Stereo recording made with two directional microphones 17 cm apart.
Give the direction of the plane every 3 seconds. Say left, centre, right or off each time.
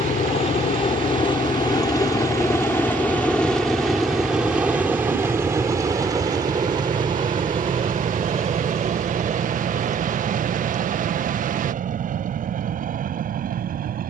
left, centre, right, right, right.